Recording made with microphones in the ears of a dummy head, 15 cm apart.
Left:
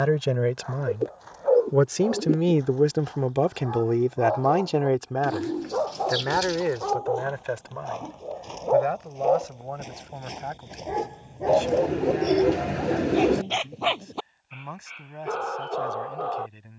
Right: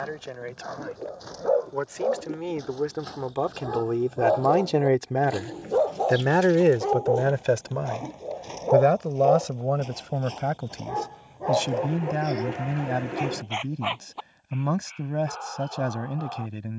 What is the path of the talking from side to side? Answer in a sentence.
In this clip you hear the talking move from left to right.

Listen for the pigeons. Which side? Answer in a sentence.
In this clip you hear the pigeons on the left.